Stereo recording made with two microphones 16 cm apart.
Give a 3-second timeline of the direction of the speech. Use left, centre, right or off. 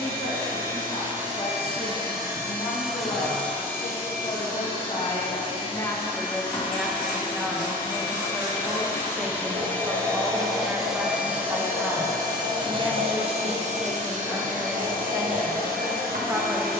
left, left, centre, centre, centre, centre.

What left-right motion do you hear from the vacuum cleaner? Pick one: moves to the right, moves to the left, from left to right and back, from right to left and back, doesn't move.
from right to left and back.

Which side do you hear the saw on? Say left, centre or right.
right.